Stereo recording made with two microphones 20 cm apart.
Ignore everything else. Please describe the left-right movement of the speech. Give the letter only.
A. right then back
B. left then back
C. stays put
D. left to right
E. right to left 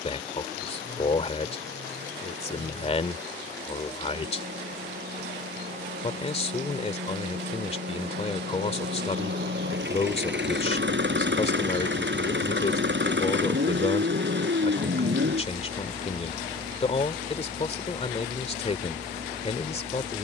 C.